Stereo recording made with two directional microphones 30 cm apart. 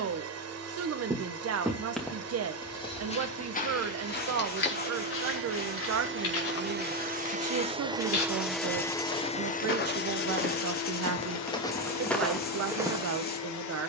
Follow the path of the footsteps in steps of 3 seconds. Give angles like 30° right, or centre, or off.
centre, 40° left, 50° left, 30° left, centre.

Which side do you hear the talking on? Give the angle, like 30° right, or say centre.
50° right.